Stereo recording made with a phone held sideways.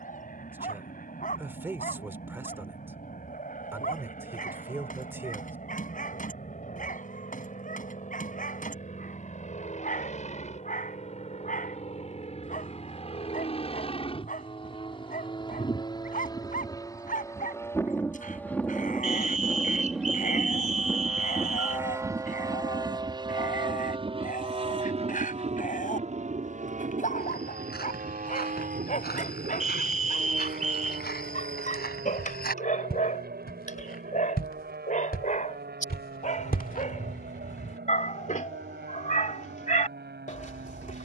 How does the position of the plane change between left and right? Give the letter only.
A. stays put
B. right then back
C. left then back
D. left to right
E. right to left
D.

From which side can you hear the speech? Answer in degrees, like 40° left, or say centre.
10° right.